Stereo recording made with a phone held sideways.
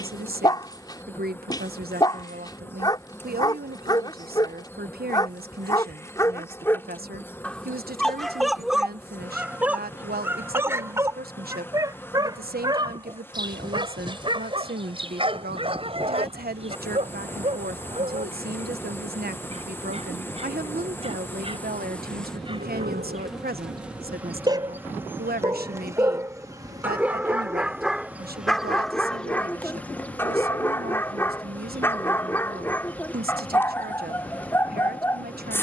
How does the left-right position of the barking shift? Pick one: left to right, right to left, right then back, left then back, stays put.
right then back.